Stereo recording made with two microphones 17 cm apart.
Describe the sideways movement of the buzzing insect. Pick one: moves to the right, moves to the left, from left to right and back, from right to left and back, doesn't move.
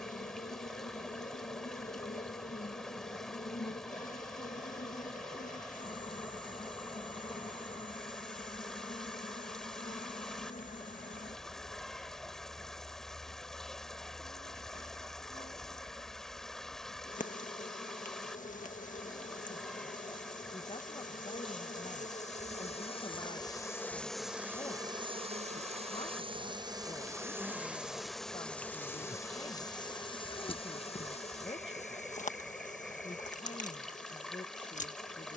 from left to right and back.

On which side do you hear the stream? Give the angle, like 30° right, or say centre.
centre.